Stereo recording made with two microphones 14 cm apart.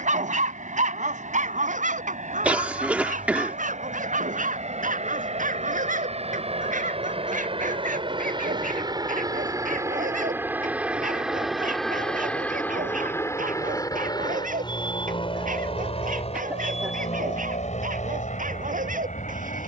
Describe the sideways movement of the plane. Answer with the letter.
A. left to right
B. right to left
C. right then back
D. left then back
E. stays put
B.